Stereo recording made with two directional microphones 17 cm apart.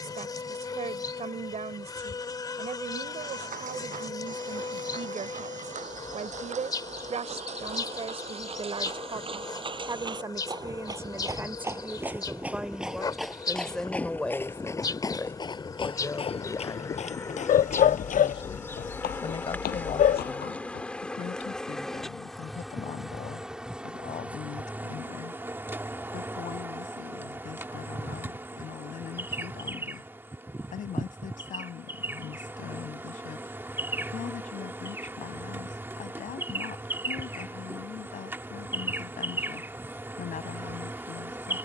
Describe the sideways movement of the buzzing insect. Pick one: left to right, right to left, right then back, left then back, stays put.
left to right.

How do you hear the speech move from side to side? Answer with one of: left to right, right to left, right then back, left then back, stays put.
right to left.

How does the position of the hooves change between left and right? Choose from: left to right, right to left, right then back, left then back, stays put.
right to left.